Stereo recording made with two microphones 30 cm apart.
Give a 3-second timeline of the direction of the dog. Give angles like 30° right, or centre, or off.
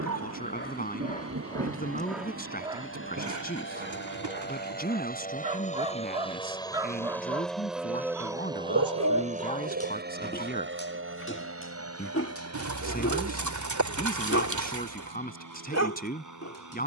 20° left, 30° right, 10° right, 30° left, 50° left, 60° left.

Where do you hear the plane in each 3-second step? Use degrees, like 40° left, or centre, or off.
50° left, 40° left, centre, 40° right, 60° right, 70° right.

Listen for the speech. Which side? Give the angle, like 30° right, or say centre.
30° left.